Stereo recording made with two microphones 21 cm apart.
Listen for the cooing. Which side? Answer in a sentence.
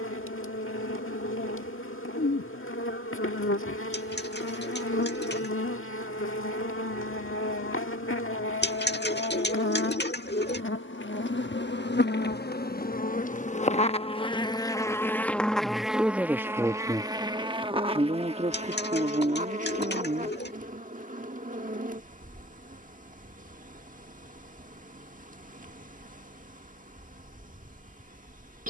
In this clip you hear the cooing on the left.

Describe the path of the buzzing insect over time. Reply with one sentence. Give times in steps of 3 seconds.
In this clip you hear the buzzing insect on the left from 0 s, in the centre from 15 s and on the right from 18 s.